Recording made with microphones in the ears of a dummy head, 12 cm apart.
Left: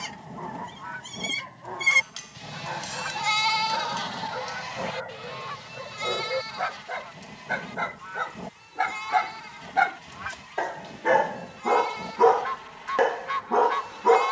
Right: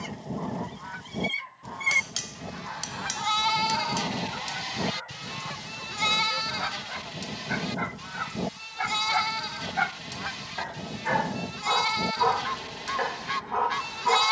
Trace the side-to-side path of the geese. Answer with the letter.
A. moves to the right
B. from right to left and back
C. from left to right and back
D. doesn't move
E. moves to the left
D.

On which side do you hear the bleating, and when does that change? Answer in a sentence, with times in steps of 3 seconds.
In this clip you hear the bleating on the left from 0 s and on the right from 3 s.